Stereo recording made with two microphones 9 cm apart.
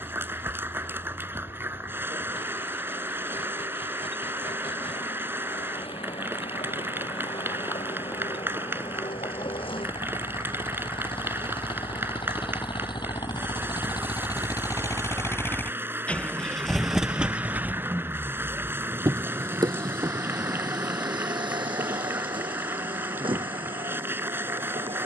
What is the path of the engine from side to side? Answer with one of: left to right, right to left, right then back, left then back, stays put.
left to right.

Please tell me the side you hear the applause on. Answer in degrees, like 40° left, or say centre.
20° right.